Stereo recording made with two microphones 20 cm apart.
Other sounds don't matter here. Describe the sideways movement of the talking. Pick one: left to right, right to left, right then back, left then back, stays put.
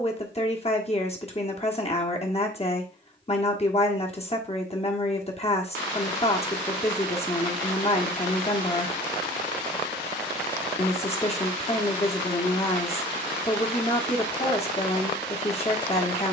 stays put.